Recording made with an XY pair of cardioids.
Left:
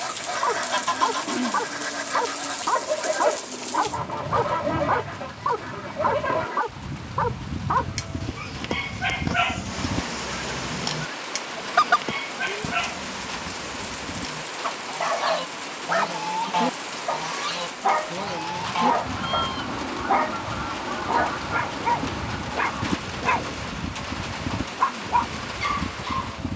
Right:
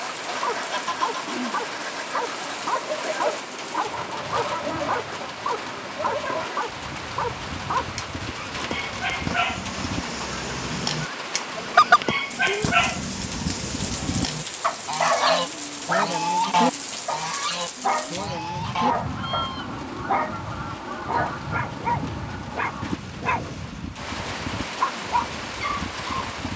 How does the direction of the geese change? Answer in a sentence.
In this clip you hear the geese move from left to right and back again.